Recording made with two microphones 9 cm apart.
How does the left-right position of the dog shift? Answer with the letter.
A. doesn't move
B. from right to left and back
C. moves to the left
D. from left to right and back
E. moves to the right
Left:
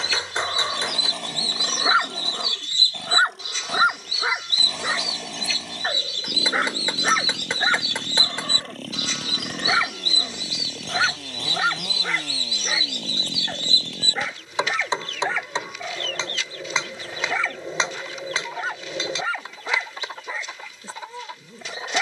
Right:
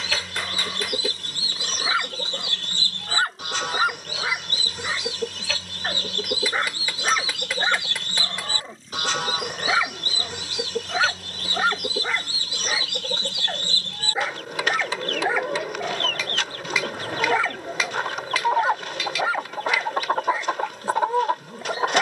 E.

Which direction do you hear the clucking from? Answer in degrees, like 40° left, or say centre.
60° right.